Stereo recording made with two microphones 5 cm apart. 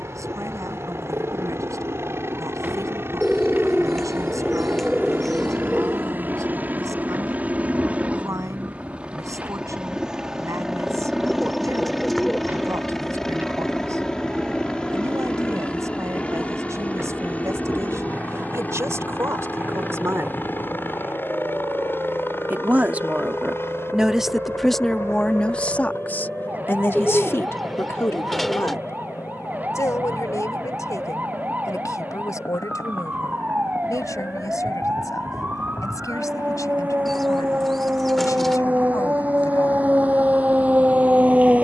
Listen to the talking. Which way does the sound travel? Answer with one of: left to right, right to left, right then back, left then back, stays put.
right to left.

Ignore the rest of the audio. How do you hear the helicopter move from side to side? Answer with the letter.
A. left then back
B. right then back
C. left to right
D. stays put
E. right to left
E.